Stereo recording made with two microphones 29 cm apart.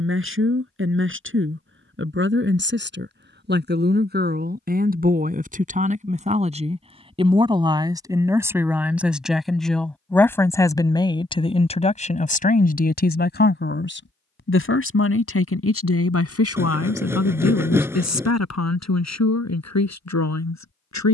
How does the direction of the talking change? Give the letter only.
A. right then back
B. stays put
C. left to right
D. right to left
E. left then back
D.